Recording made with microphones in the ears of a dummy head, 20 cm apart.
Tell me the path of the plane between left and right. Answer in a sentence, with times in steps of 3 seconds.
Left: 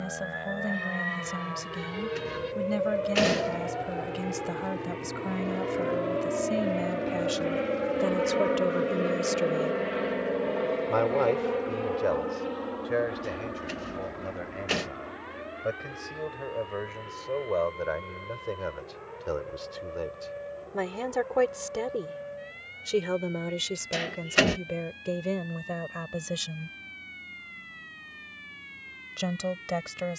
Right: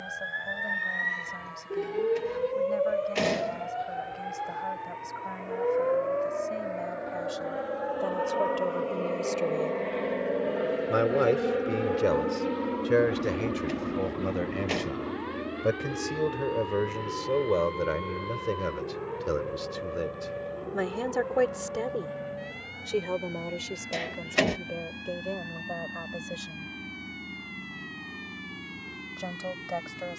You can hear the plane on the left from 0 s, in the centre from 9 s and on the right from 12 s.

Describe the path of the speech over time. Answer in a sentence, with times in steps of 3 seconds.
In this clip you hear the speech on the left from 0 s, in the centre from 9 s, on the right from 12 s, in the centre from 21 s and on the left from 24 s.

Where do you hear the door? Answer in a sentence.
In this clip you hear the door in the centre.